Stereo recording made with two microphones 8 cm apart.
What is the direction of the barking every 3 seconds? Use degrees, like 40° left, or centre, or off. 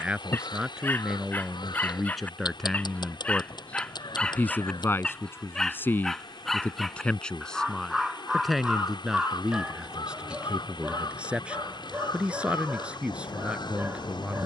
20° left, 10° left, centre, 10° right, 20° right.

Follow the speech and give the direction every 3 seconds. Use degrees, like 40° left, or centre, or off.
centre, 20° left, 10° left, 10° right, 10° right.